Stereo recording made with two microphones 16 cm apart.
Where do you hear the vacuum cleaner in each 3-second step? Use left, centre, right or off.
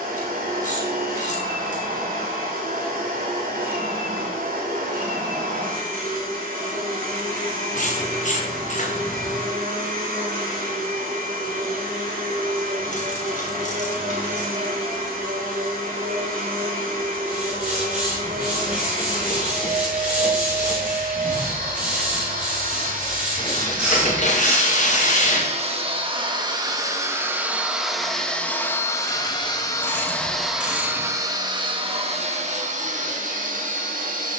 right, right, right, right, right, right, right, right, right, centre, right, right.